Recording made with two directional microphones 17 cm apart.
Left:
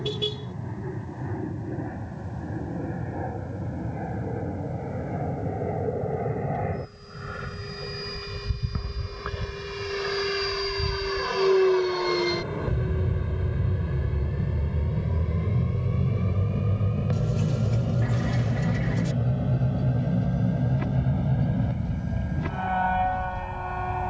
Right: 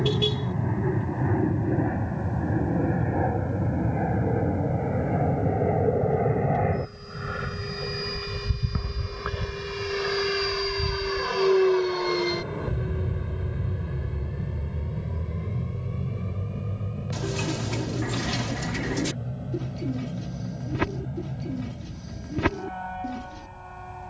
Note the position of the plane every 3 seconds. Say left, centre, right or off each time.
right, right, right, centre, centre, left, left, left.